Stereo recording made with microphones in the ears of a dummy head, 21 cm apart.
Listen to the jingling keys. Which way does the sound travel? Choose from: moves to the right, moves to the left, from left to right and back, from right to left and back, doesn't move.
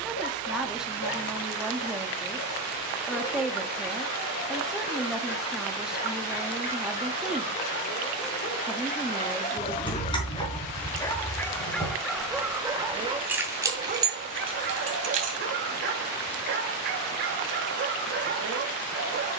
moves to the right.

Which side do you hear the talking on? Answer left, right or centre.
centre.